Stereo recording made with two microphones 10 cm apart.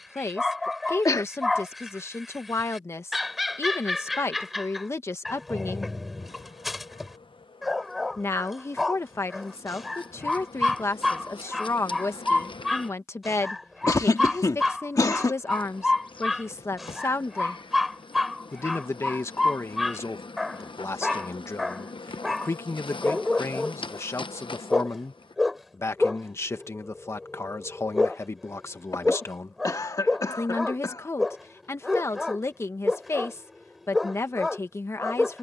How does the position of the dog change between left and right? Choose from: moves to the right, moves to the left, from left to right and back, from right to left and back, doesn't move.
doesn't move.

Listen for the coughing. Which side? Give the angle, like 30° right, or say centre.
40° left.